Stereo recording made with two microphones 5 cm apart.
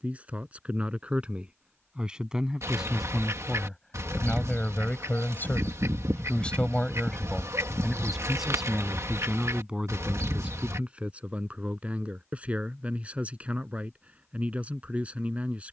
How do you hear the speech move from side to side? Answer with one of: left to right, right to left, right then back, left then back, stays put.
left then back.